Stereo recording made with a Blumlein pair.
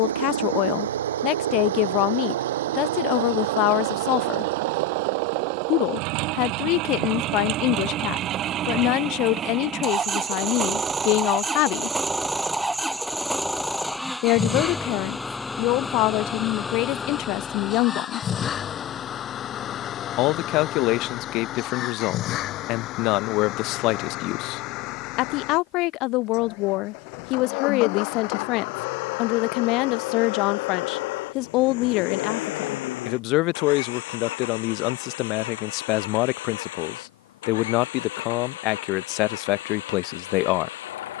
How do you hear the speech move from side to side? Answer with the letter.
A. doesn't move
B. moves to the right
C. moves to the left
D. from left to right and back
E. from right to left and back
A.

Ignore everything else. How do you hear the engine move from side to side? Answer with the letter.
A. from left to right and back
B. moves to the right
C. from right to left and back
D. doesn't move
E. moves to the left
E.